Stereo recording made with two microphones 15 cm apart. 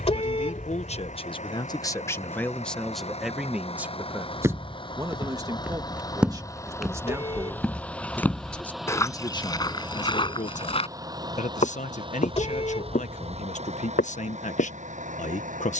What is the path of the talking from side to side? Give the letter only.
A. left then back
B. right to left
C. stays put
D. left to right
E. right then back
E.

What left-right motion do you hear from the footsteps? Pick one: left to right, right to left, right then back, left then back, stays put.
right to left.